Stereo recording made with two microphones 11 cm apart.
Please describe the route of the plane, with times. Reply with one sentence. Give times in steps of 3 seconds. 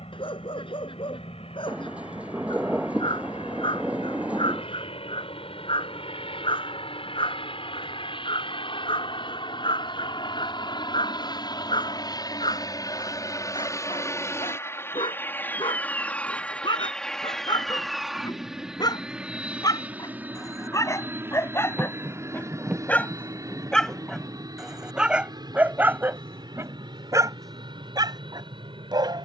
In this clip you hear the plane on the left from 0 s, in the centre from 15 s and on the right from 21 s.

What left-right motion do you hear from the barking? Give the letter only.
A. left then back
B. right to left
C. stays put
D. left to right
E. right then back
D.